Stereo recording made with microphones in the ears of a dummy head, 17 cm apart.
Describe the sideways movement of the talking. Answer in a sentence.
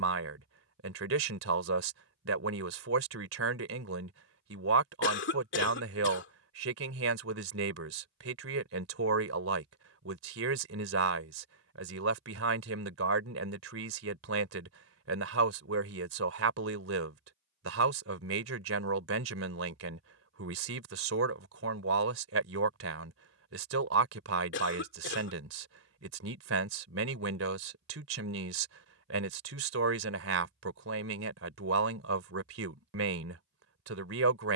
In this clip you hear the talking stay put.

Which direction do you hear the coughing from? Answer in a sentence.
In this clip you hear the coughing on the left.